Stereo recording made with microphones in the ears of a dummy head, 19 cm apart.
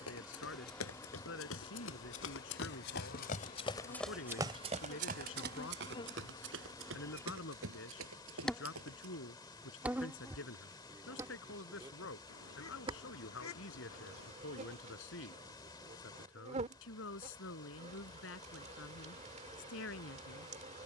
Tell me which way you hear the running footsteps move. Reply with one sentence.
In this clip you hear the running footsteps travel towards the right.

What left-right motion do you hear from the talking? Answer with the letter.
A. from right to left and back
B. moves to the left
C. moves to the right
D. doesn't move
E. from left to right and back
D.